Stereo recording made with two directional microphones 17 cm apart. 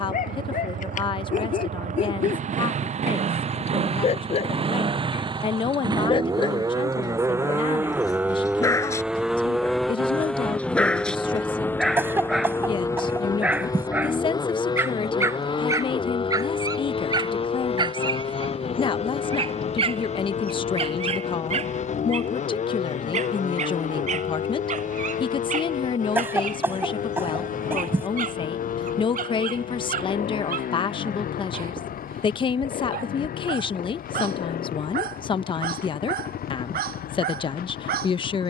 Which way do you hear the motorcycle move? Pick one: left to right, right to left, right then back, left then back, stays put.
right to left.